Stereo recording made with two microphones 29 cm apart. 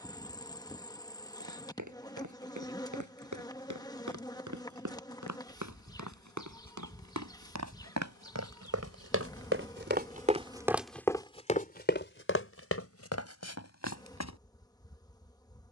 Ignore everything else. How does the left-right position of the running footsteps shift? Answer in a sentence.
In this clip you hear the running footsteps move to the left.